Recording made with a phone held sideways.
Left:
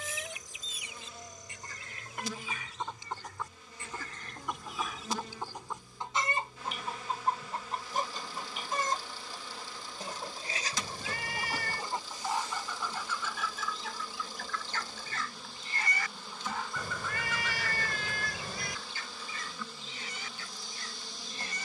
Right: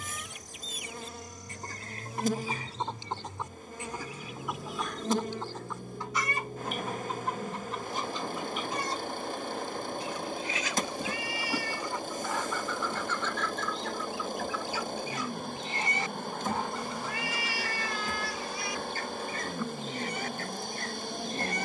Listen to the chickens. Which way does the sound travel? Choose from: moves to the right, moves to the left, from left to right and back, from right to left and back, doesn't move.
from right to left and back.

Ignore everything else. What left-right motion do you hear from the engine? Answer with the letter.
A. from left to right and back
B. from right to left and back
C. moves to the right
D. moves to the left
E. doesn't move
E.